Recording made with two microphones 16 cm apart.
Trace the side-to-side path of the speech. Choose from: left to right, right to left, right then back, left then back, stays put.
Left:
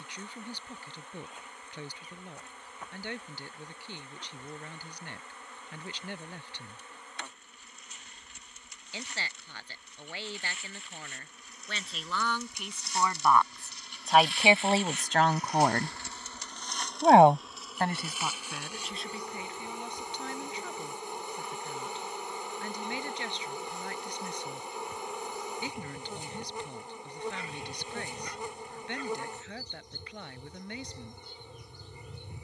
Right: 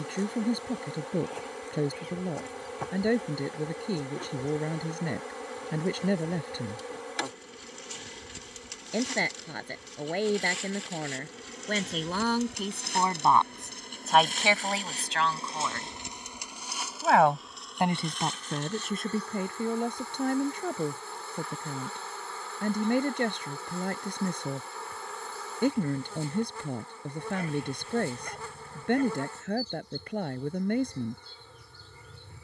left then back.